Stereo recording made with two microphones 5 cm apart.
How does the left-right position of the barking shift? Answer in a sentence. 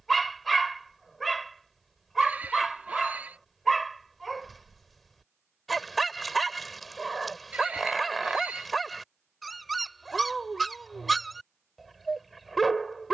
You can hear the barking stay put.